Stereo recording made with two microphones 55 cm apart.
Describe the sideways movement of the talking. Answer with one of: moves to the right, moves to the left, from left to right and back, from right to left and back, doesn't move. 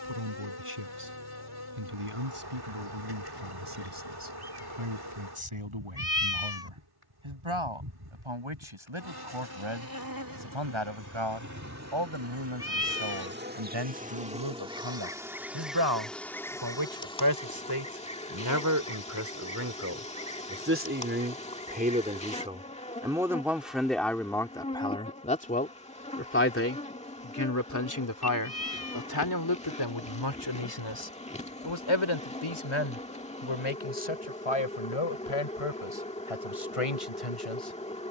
moves to the left.